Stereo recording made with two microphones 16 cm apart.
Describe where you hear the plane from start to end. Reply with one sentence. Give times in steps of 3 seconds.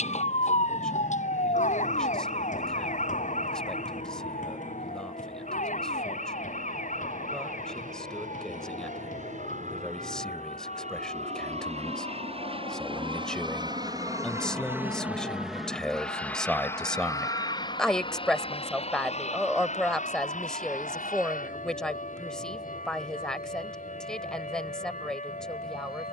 In this clip you hear the plane on the right from 0 s, in the centre from 15 s and on the left from 18 s.